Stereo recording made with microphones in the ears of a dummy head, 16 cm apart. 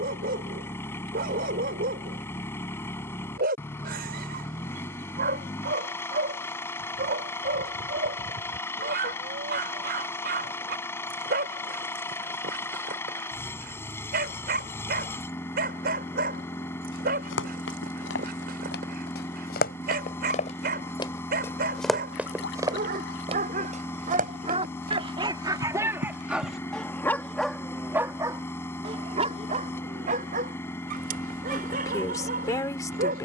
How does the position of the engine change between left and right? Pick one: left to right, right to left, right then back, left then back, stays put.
stays put.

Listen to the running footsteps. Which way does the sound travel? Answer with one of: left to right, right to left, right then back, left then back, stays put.
left to right.